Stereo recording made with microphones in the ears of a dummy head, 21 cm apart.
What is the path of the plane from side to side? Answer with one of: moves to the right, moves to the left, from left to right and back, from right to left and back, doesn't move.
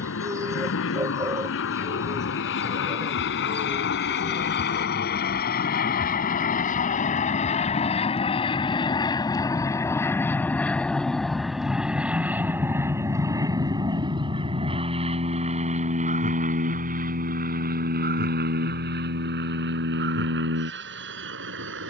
moves to the right.